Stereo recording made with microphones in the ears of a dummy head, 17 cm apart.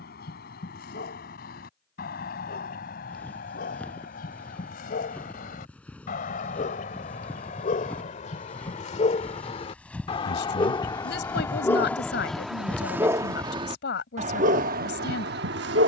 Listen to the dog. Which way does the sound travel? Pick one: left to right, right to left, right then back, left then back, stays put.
left to right.